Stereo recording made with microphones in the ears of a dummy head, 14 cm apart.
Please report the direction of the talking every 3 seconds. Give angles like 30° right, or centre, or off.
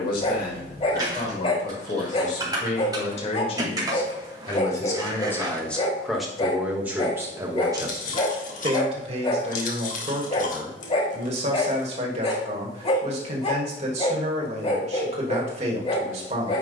50° left, 20° left, 20° right, 40° right, 40° right, 40° right.